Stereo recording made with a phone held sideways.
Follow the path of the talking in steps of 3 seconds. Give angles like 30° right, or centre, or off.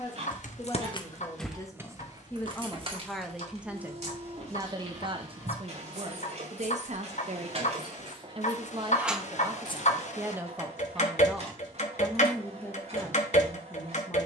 20° left, 30° right, 50° right, 20° right, 20° left.